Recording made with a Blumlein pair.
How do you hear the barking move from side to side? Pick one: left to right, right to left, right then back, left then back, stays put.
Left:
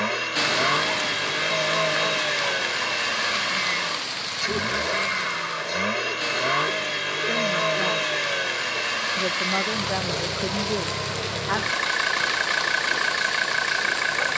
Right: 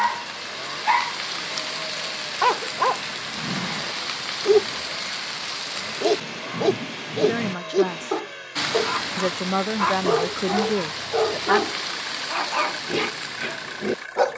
stays put.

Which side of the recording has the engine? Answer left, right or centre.
left.